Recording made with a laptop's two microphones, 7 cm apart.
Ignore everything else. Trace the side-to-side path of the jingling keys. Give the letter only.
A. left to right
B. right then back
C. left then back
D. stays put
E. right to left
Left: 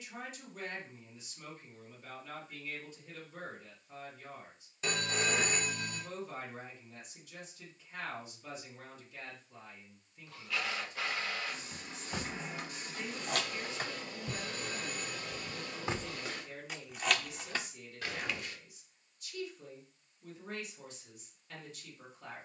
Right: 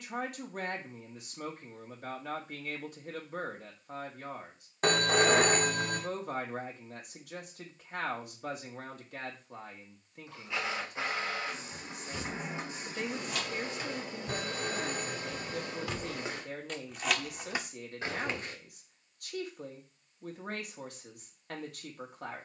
A.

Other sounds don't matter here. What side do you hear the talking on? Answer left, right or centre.
right.